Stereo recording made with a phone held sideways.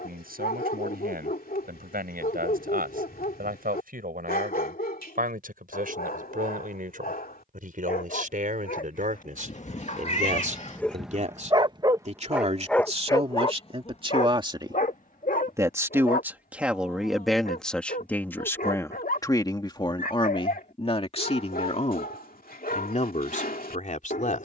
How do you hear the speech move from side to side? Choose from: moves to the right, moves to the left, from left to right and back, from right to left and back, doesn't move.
moves to the left.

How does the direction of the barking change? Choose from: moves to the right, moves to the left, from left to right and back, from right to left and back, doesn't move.
from left to right and back.